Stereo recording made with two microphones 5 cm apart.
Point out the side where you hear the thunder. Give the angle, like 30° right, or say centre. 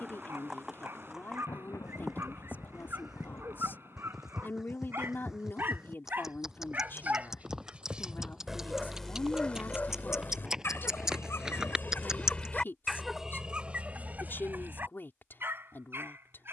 70° left.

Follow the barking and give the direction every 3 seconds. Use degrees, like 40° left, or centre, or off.
50° right, 50° right, 20° right, 40° left, 10° right, 50° right.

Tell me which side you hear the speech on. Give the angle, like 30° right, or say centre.
40° left.